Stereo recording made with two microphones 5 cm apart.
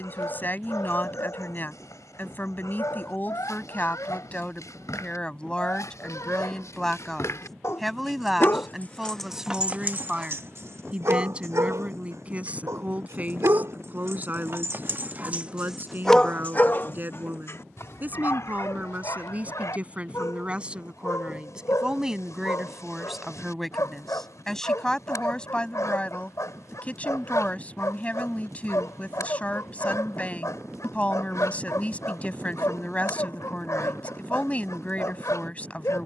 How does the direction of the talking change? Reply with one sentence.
In this clip you hear the talking move from left to right and back again.